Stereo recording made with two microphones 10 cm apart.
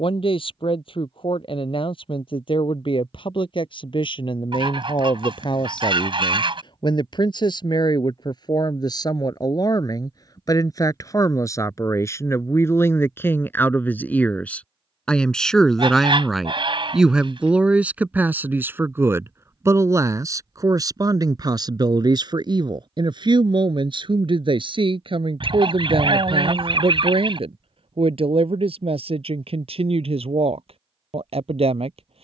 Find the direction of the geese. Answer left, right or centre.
right.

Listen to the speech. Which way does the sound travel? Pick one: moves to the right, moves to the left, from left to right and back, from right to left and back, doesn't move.
moves to the right.